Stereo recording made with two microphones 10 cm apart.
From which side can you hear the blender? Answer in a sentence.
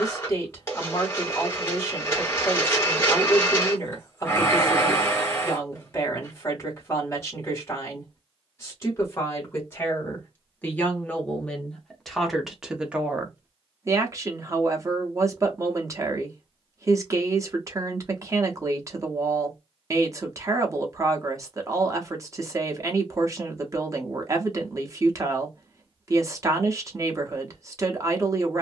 You can hear the blender on the left.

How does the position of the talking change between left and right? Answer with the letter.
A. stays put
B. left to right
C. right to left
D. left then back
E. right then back
B.